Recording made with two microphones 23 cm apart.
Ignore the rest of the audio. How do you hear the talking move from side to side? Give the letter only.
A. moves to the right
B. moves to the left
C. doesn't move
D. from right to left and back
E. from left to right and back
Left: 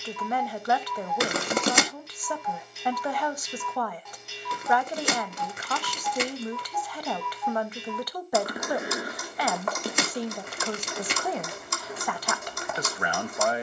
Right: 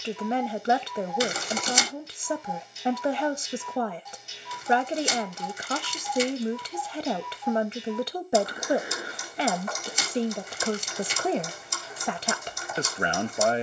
C.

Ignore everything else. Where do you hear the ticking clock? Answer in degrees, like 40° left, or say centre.
70° left.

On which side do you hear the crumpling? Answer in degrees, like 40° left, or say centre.
70° left.